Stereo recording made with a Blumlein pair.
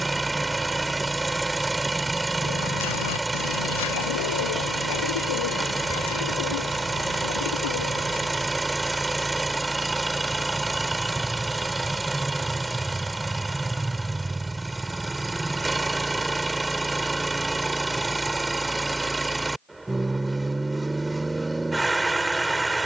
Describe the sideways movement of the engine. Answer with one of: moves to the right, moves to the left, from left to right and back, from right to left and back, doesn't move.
doesn't move.